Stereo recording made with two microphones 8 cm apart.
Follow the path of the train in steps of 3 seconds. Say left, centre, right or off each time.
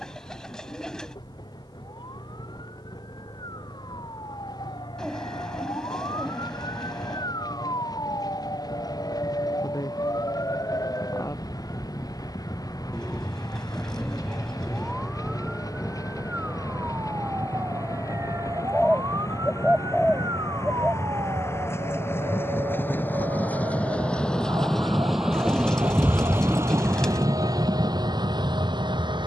left, left, left, left, left, left, left, left, centre, right.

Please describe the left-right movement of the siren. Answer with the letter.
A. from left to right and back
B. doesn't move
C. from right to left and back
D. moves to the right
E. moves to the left
D.